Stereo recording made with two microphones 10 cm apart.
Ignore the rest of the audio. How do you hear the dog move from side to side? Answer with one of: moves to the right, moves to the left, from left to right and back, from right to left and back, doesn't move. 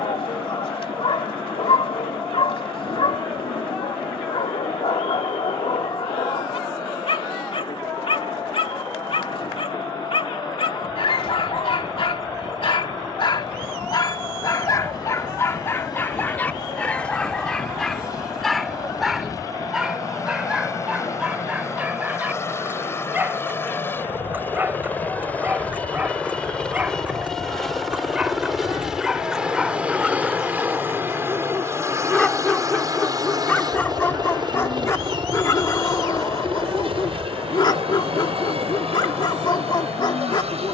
from left to right and back.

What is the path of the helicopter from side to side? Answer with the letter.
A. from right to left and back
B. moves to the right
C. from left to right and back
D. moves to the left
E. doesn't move
B.